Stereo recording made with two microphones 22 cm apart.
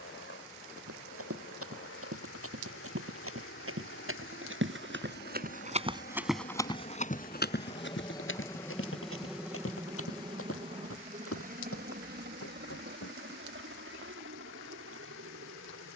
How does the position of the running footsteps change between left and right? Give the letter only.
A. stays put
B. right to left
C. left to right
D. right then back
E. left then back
B.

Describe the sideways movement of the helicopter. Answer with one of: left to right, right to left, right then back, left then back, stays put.
left to right.